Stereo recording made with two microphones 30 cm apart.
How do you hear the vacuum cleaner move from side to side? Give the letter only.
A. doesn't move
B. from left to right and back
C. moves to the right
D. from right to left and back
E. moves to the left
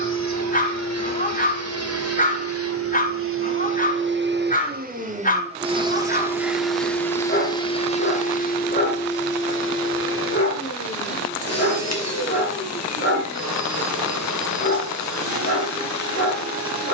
E.